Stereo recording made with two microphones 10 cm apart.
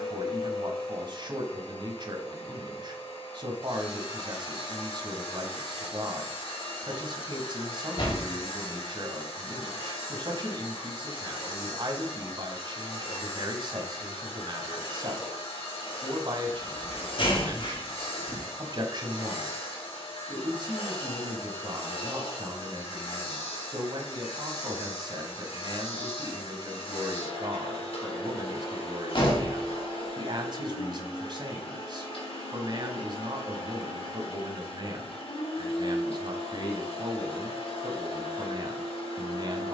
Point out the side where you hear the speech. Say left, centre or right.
right.